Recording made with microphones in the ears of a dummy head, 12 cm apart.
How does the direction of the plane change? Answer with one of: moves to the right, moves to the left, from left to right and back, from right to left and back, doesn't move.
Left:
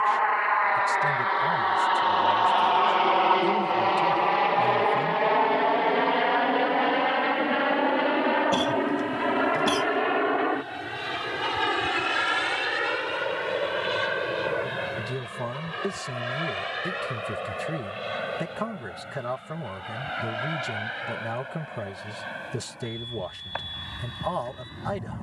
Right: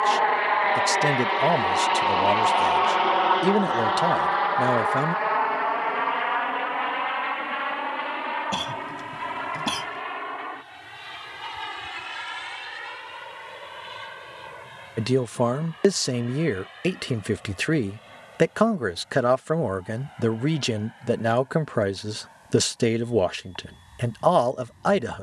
moves to the left.